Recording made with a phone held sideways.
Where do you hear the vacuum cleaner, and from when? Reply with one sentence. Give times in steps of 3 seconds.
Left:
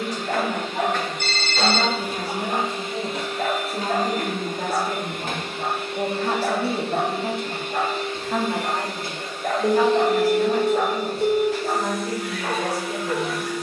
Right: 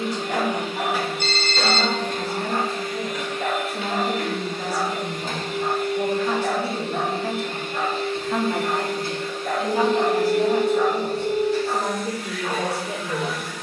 In this clip you hear the vacuum cleaner in the centre from 0 s and on the left from 3 s.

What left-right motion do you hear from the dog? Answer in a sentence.
You can hear the dog stay put.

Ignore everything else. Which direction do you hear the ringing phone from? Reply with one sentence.
In this clip you hear the ringing phone on the left.